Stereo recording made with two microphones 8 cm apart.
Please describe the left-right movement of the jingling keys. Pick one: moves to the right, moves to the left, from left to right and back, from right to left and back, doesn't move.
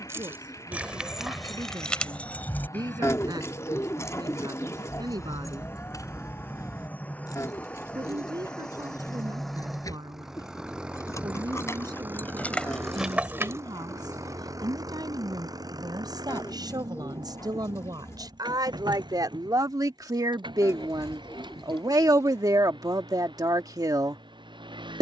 from right to left and back.